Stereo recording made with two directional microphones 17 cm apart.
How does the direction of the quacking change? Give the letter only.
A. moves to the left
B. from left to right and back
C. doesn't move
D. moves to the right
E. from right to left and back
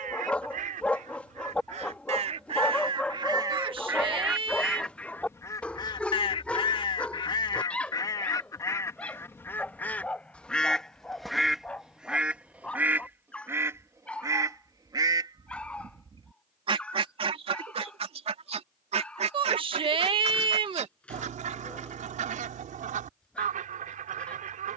E.